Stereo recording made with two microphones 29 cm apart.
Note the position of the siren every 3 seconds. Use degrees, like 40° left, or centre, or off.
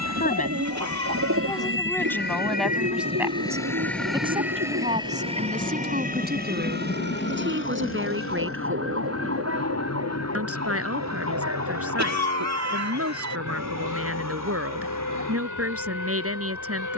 50° left, 10° right, 40° right, 50° right, 60° right, 60° right.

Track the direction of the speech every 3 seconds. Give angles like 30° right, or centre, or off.
10° left, 20° right, 40° right, 50° right, 50° right, 50° right.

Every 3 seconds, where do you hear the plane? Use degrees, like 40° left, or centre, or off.
40° right, centre, 40° left, 60° left, 60° left, 70° left.